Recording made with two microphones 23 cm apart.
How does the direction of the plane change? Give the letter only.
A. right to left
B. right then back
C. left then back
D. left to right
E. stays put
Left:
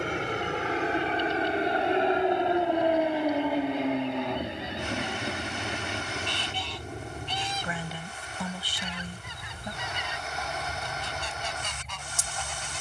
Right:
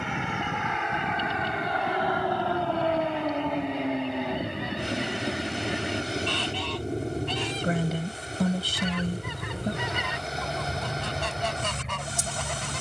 D.